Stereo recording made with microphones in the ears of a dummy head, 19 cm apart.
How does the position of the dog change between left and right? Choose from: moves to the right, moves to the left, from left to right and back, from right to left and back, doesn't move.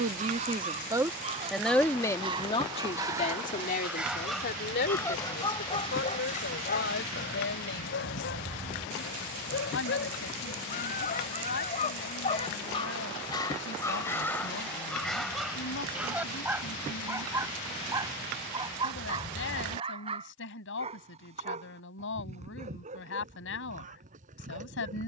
from right to left and back.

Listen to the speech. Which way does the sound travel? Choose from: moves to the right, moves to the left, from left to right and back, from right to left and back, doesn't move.
moves to the left.